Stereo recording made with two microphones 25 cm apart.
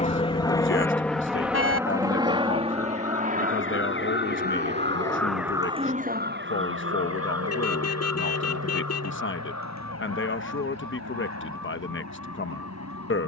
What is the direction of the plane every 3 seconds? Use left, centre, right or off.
centre, right, right, right, right.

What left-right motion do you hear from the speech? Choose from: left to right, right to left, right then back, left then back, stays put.
stays put.